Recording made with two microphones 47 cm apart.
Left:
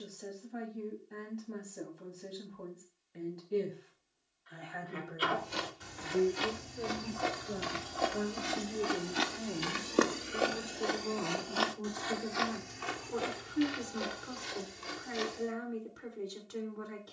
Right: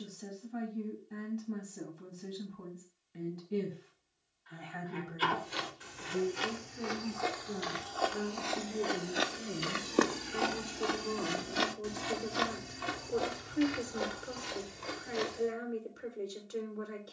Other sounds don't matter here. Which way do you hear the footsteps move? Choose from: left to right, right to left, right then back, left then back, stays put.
left to right.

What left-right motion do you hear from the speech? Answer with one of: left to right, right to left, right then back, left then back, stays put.
right to left.